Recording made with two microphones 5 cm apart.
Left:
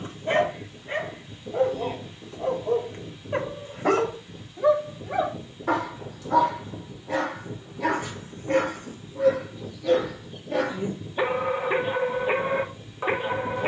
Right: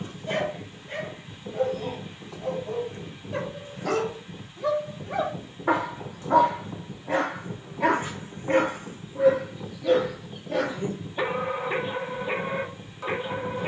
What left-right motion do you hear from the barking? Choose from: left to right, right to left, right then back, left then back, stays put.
right then back.